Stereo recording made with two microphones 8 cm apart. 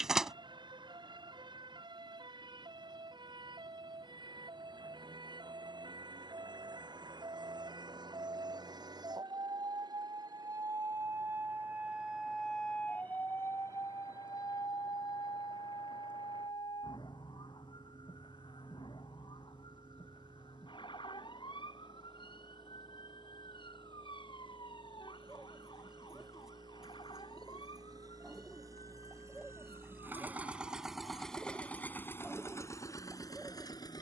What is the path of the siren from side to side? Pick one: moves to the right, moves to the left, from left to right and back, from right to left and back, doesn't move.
moves to the left.